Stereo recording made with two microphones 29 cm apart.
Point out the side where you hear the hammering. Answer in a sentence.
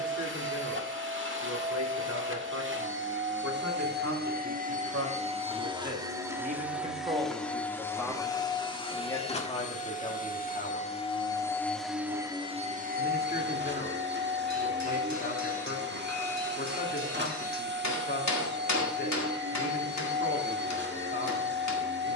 In this clip you hear the hammering on the left.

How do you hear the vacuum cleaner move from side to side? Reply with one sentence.
In this clip you hear the vacuum cleaner move from right to left and back again.